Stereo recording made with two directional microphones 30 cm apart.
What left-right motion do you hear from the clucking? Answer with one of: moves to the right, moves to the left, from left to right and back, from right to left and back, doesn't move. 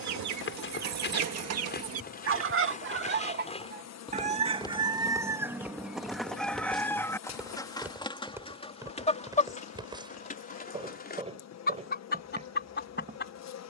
moves to the left.